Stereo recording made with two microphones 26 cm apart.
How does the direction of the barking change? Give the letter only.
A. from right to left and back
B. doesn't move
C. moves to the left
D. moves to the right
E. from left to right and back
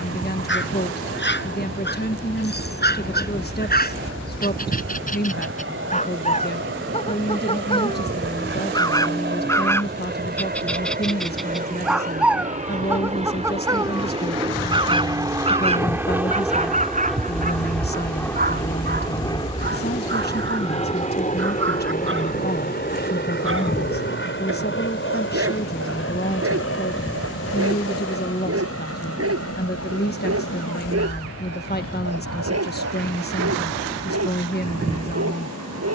D.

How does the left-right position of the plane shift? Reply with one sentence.
In this clip you hear the plane go from the right side to the left.